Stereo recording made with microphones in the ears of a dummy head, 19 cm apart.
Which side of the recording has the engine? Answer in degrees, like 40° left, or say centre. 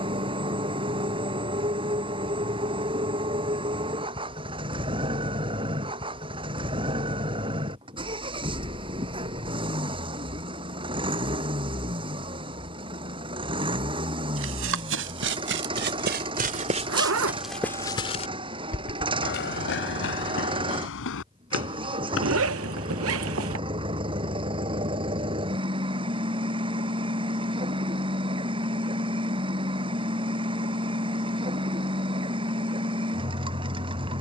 20° right.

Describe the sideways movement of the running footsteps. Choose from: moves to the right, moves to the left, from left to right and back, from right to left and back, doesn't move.
moves to the left.